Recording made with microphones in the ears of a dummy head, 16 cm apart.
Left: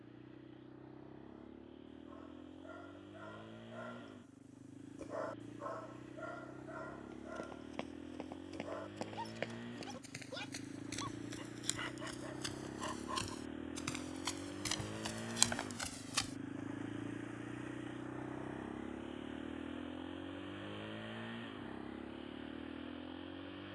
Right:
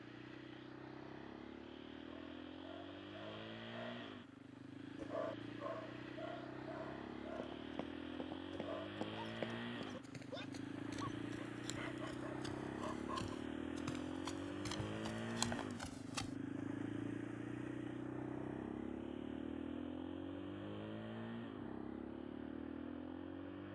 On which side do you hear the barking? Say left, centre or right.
left.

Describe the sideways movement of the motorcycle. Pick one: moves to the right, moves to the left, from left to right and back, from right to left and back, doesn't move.
moves to the left.